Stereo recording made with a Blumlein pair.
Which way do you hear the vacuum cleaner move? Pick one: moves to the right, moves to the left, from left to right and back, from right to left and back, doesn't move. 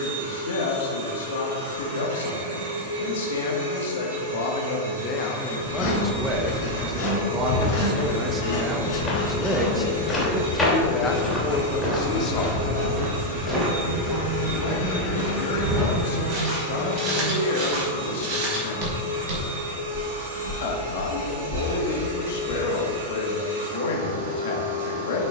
doesn't move.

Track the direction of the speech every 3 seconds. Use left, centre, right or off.
left, left, right, centre, left, left, left, left, left.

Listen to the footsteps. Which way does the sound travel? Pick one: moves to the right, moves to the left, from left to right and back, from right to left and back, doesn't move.
moves to the right.